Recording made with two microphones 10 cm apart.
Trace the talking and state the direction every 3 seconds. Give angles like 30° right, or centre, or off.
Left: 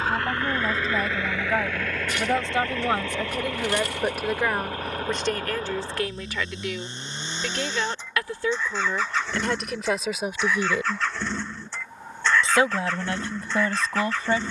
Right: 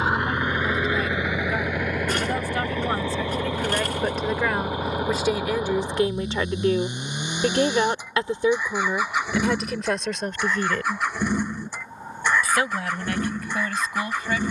30° left, centre, 30° right, centre, 30° left.